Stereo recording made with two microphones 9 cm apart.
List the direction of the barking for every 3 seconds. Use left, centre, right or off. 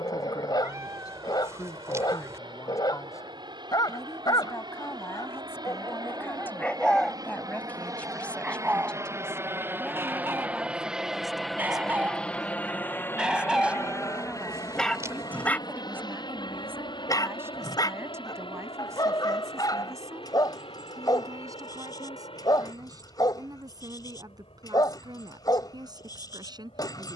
left, left, centre, right, centre, left, left, left, left.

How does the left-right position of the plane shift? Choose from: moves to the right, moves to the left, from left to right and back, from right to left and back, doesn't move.
moves to the left.